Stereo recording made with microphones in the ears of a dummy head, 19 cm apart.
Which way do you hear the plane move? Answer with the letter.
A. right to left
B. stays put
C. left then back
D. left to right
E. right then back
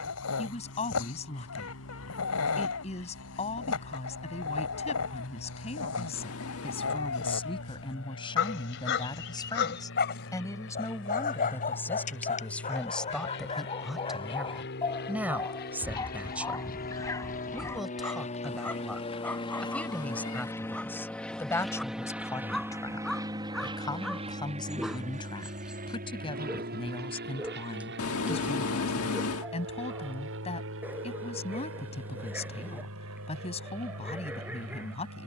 D.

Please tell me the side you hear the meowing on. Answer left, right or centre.
left.